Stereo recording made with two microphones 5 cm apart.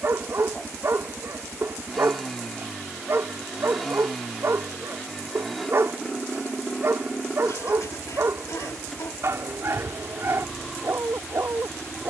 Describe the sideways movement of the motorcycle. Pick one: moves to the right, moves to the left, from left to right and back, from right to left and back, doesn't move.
doesn't move.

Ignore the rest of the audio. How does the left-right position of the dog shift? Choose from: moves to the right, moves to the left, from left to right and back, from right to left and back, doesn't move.
doesn't move.